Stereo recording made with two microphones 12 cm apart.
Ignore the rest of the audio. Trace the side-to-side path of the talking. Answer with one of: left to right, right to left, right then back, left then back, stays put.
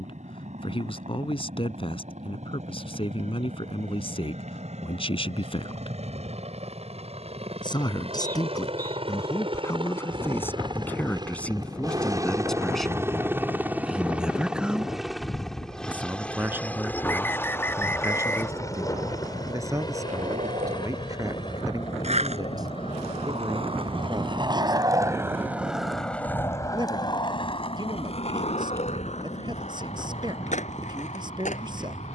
left to right.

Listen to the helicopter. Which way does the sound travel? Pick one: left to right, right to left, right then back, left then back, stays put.
right to left.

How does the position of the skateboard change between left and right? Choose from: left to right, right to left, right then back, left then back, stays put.
right to left.